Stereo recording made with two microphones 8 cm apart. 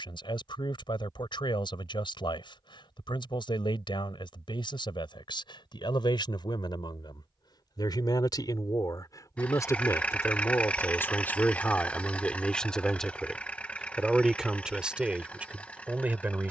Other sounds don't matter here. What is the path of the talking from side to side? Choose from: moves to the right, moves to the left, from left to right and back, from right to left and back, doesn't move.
moves to the right.